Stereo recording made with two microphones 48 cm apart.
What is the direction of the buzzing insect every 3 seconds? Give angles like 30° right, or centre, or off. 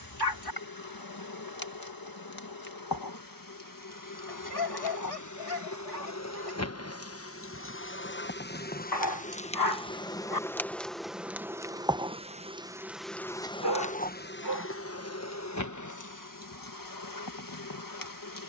50° left, 40° left, 30° left, centre, 10° left, 40° left.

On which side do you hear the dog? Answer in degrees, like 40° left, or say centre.
50° left.